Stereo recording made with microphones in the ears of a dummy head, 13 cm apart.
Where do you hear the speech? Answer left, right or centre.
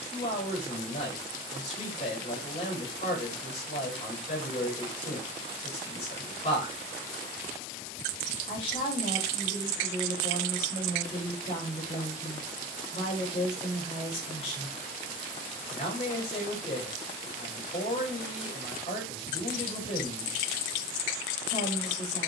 left.